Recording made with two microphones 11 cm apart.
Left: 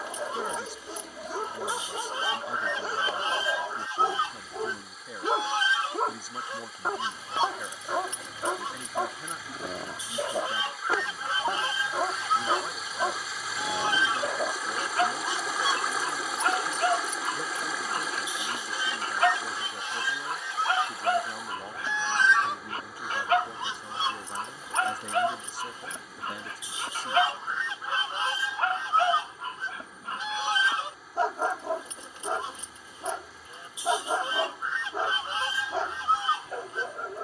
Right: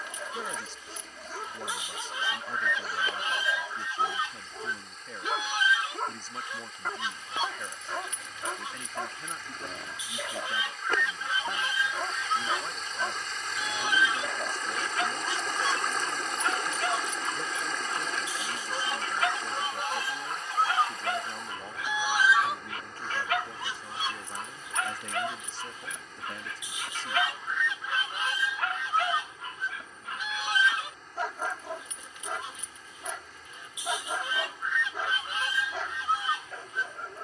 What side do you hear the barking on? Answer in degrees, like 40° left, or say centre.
30° left.